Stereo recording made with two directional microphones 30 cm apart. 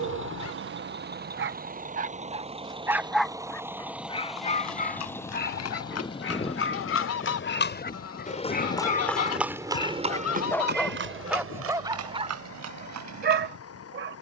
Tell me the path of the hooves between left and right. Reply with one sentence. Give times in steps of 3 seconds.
In this clip you hear the hooves not at all from 0 s, on the left from 3 s and on the right from 9 s.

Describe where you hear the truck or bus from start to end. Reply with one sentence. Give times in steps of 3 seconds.
In this clip you hear the truck or bus on the right from 0 s, in the centre from 3 s and on the left from 6 s.